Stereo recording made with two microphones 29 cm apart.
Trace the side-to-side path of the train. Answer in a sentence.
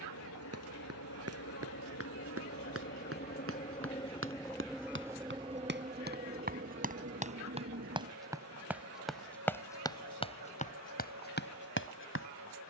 You can hear the train go from the left side to the right.